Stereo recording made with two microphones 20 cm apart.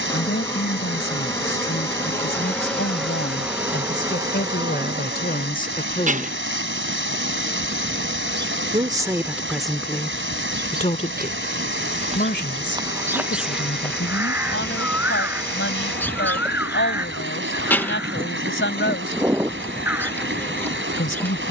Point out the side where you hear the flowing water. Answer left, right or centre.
right.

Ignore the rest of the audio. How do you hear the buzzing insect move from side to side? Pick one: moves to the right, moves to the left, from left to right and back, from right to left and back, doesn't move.
from left to right and back.